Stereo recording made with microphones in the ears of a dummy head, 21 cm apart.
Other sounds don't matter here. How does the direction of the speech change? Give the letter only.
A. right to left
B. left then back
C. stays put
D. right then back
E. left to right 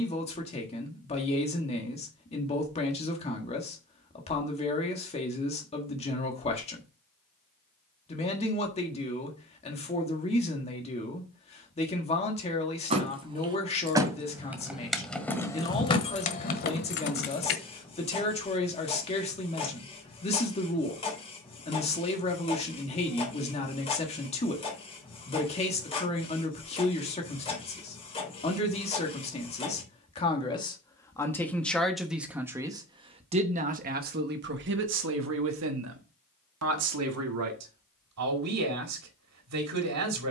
E.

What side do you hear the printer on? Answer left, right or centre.
left.